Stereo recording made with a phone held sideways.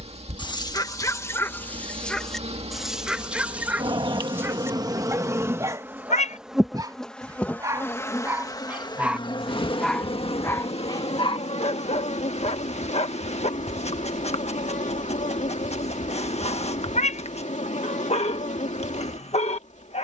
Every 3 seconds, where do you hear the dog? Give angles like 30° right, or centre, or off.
20° left, 20° right, 20° right, 20° left, 50° left, 50° left, 50° left.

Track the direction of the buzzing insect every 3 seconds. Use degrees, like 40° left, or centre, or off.
50° right, 30° right, 10° left, 50° left, 60° left, 60° left, 60° left.